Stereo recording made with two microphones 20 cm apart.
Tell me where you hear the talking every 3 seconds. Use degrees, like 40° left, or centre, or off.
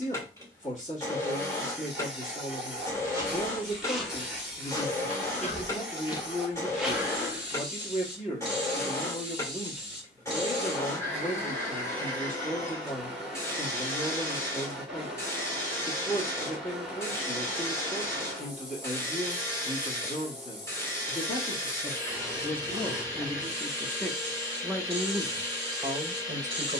40° left, 40° left, 40° left, 40° left, 40° left, 40° left, 40° left, 20° left, 20° right.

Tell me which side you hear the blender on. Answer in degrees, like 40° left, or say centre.
10° left.